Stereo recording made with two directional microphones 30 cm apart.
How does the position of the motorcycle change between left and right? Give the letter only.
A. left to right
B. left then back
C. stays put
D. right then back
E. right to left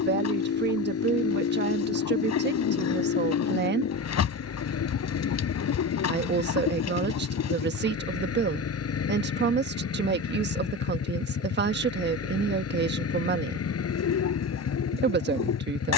C.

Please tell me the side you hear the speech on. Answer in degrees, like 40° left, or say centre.
40° right.